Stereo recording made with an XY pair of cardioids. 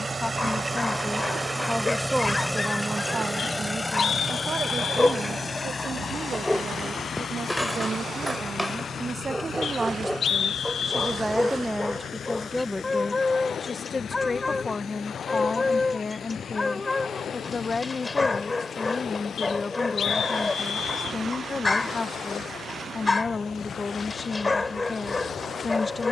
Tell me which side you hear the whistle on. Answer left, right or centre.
left.